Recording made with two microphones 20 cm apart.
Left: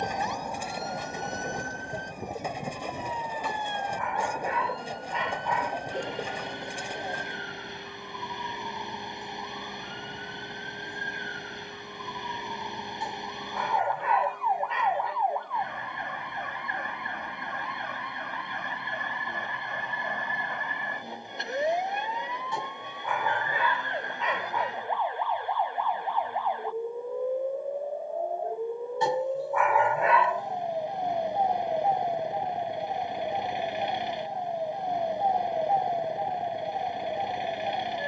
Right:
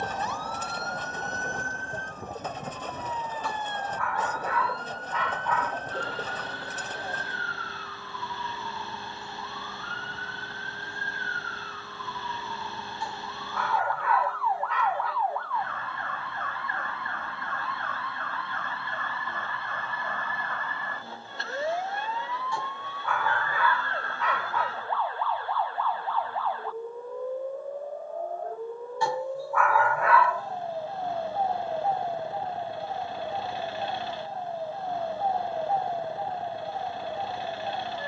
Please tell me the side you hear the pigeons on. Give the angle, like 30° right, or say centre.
10° left.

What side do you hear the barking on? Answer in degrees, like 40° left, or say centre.
20° left.